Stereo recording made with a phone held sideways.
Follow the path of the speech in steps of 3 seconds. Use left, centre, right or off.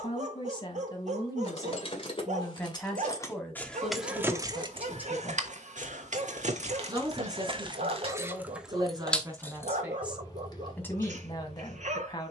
left, centre, right, centre.